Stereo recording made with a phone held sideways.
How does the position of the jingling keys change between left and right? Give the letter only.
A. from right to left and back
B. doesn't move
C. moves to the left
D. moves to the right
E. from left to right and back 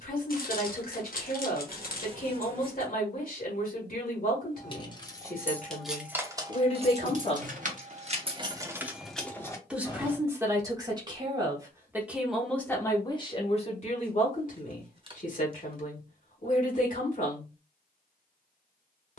E.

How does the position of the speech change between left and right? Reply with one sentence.
In this clip you hear the speech move from left to right and back again.